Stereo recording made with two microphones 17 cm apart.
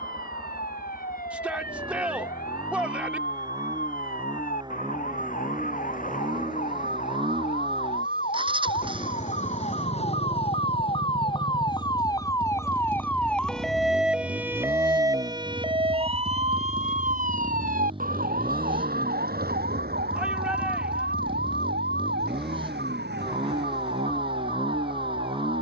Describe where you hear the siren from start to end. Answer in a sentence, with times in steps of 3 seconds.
In this clip you hear the siren on the left from 0 s, in the centre from 12 s and on the right from 15 s.